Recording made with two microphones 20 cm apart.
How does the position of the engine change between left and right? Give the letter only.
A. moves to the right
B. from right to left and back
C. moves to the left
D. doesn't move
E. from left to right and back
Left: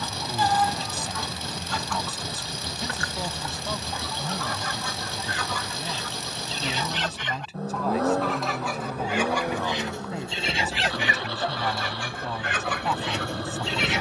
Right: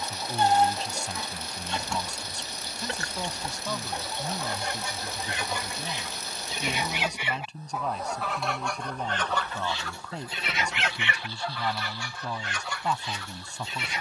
D.